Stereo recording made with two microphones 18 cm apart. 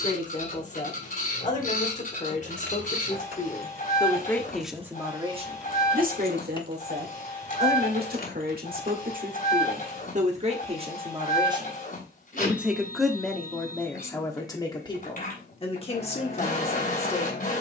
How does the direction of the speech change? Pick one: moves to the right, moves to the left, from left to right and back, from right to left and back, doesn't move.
from left to right and back.